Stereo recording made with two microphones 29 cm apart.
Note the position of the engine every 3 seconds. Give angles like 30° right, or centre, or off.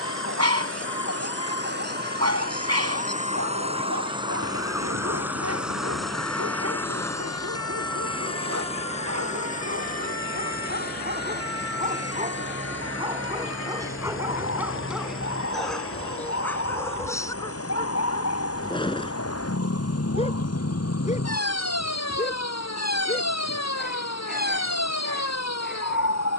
40° right, 10° right, 10° left, 30° left, 40° left, 50° left, 60° left, 60° left, 60° left.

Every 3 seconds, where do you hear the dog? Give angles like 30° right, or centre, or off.
60° right, 60° right, 60° right, 40° right, 10° right, 10° left, 20° left, 30° left, 30° left.